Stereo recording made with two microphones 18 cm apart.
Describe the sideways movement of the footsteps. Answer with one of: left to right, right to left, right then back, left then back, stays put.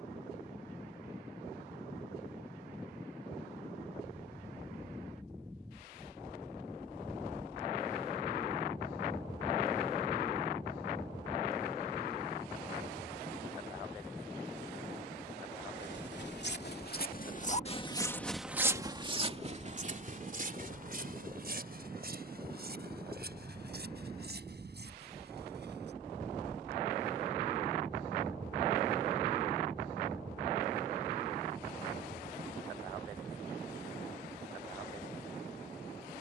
left to right.